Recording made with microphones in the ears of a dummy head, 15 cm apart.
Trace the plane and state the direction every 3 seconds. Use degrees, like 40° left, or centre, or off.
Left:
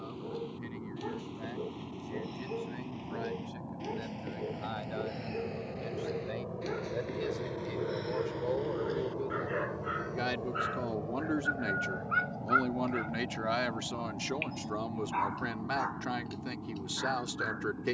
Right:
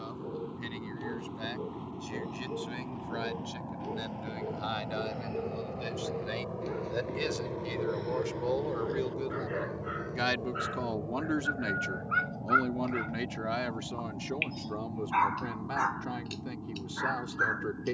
60° right, 40° right, 10° right, 30° left, 50° left, 70° left.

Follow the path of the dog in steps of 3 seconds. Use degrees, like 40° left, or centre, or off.
50° left, 40° left, 30° left, 10° left, 20° right, 50° right.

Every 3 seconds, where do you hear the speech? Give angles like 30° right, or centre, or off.
70° right, 70° right, 60° right, 30° right, 20° left, 40° left.